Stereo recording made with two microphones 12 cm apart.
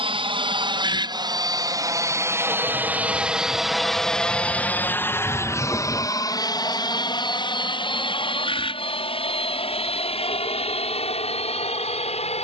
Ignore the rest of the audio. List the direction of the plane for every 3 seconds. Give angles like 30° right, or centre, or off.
30° right, 10° left, 40° left, 50° left.